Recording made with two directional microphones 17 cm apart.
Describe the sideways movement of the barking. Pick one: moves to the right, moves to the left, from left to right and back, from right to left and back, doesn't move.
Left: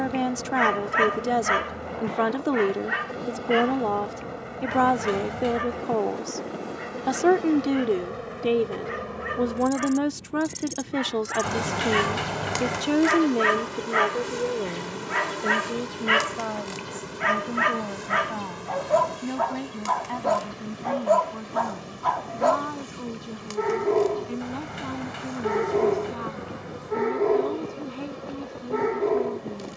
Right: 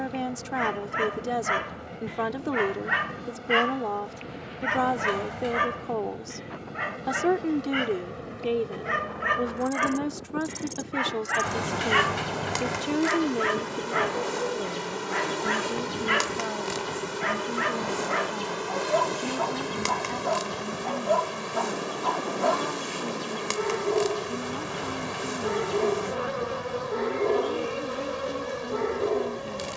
from left to right and back.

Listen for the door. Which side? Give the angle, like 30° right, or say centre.
20° left.